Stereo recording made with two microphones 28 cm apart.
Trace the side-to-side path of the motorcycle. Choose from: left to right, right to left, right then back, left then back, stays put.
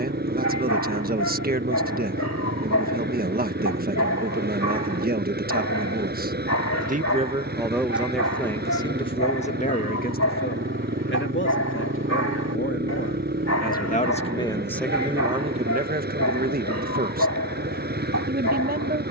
stays put.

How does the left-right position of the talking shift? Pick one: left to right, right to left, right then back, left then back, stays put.
left then back.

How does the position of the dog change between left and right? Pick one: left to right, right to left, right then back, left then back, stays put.
stays put.